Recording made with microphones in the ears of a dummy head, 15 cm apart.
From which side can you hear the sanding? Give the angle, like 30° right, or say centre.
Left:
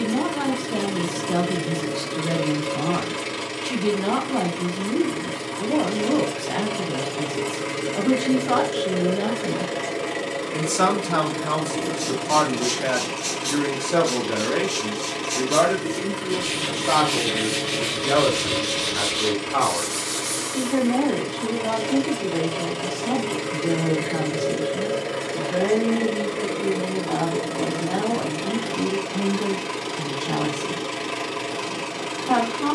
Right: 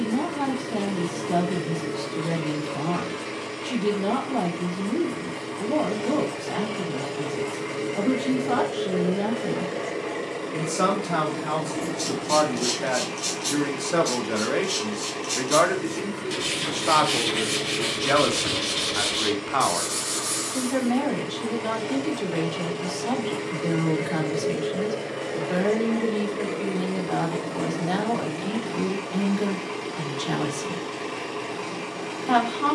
20° right.